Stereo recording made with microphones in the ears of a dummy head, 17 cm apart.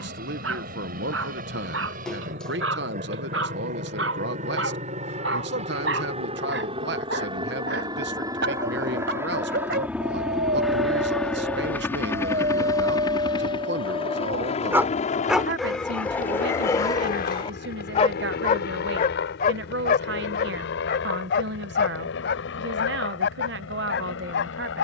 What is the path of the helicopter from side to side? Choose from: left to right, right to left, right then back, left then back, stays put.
right to left.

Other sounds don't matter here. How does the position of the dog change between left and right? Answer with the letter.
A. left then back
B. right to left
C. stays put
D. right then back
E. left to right
B.